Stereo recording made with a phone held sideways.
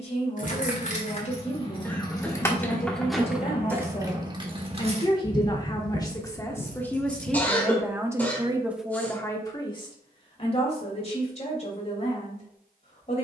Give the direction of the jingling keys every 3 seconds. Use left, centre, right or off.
left, right, right, off, off.